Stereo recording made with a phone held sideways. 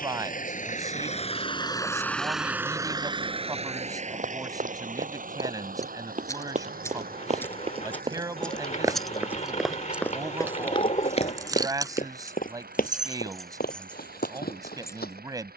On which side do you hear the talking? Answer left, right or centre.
right.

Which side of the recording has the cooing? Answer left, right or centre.
left.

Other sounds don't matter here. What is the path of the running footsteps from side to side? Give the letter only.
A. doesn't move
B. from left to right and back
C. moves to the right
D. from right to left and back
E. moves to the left
E.